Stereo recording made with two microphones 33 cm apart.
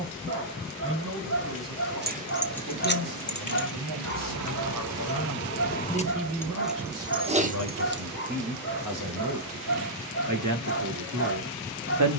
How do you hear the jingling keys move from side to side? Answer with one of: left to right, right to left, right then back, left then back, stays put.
left then back.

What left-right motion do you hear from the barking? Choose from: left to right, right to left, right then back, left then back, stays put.
stays put.